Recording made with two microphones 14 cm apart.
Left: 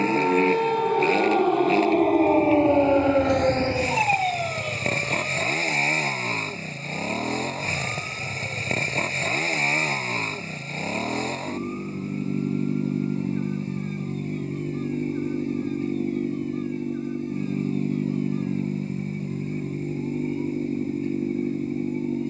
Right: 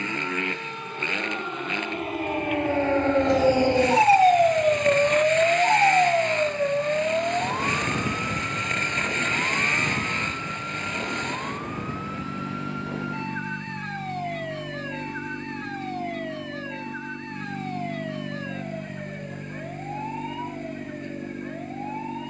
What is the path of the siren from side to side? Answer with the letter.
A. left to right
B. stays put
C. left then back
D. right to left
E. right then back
A.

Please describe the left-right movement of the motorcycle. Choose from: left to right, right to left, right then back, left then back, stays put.
stays put.